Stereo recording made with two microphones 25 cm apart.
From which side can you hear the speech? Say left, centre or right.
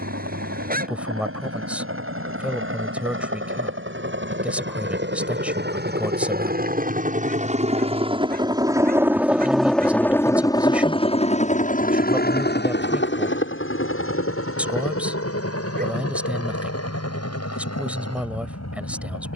centre.